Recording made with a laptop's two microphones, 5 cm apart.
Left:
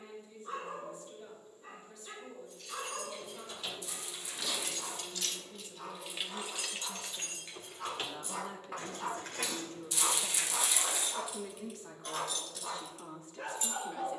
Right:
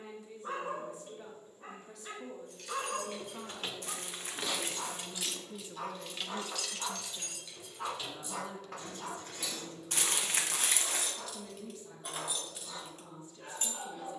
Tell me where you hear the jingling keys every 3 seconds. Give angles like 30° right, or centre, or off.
50° right, 30° right, 30° left, 40° left, 30° right.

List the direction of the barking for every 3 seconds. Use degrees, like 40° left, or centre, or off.
60° right, 50° right, 20° right, 50° left, 70° left.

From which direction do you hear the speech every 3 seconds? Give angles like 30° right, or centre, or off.
70° right, 50° right, centre, 50° left, 60° left.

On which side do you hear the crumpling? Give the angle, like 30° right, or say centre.
50° right.